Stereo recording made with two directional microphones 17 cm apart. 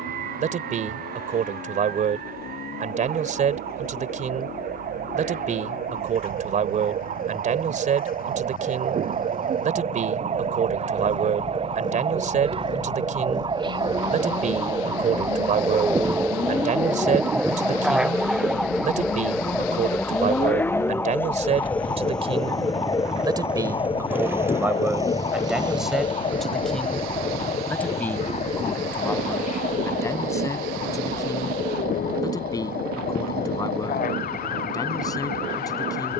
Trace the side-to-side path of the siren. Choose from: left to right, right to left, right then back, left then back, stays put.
right to left.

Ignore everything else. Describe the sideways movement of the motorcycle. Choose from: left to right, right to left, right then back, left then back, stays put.
left to right.